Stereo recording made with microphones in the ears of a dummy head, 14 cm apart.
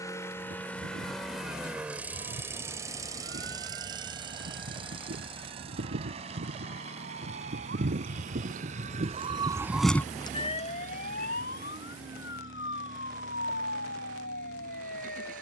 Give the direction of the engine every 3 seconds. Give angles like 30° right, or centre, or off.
centre, 30° right, 50° right, 50° right, 60° right.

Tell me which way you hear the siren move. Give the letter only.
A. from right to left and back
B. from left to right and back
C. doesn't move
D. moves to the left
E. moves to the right
D.